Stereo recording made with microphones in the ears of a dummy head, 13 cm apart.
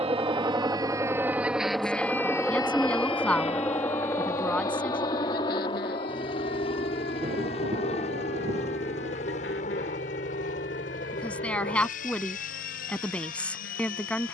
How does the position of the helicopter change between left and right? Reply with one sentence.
You can hear the helicopter move to the left.